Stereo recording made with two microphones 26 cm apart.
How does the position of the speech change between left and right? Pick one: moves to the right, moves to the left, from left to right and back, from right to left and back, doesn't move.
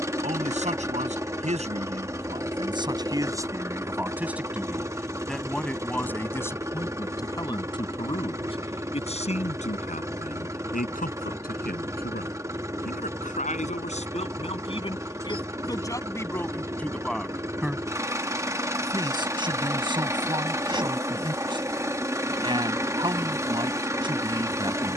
from right to left and back.